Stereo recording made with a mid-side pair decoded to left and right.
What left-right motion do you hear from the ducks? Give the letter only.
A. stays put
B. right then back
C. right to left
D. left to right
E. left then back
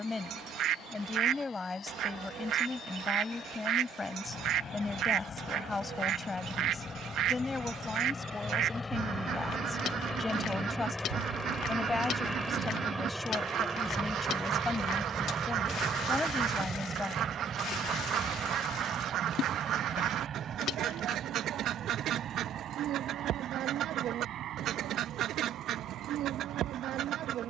A.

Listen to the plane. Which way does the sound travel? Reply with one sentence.
You can hear the plane go from the left side to the right.